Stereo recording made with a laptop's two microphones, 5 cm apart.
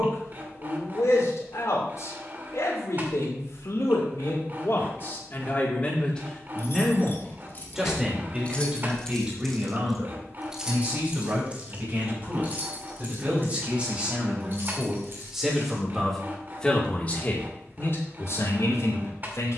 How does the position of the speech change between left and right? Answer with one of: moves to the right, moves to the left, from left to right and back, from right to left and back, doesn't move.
from left to right and back.